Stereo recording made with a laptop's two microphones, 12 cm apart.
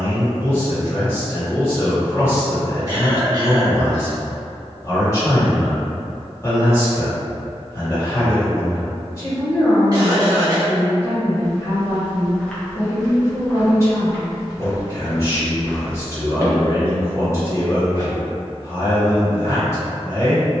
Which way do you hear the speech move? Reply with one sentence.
You can hear the speech stay put.